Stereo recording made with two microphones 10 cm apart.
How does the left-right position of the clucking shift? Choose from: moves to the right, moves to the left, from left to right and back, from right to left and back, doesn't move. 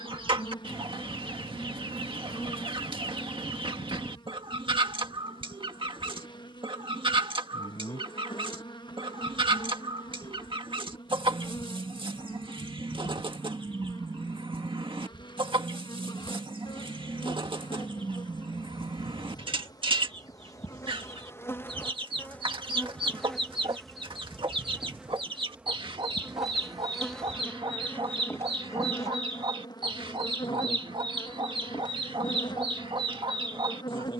doesn't move.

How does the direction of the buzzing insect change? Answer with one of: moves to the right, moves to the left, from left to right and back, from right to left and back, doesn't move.
from left to right and back.